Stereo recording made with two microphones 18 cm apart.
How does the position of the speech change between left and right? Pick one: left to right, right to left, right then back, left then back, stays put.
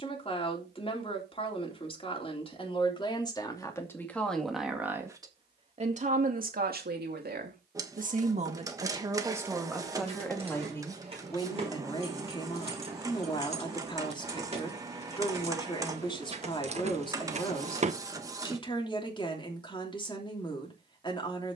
right then back.